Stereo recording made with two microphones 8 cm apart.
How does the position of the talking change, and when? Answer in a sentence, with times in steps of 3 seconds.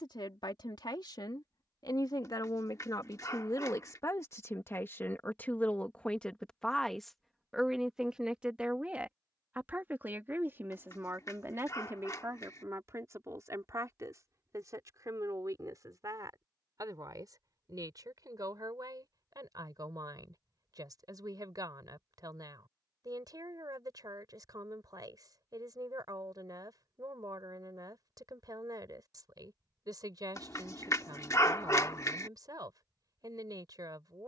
In this clip you hear the talking on the left from 0 s, in the centre from 6 s and on the right from 9 s.